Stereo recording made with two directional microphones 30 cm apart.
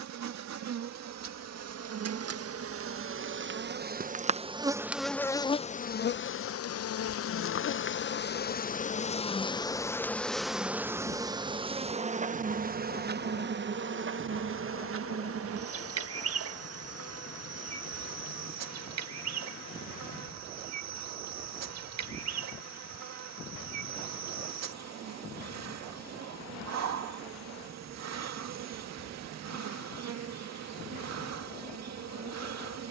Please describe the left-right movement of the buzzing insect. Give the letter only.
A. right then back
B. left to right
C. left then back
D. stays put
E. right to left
C.